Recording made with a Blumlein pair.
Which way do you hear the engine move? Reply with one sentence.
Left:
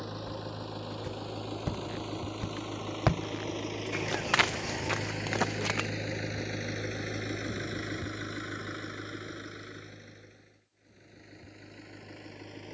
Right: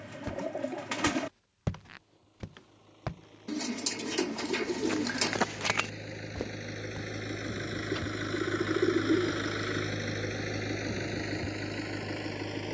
You can hear the engine move to the right.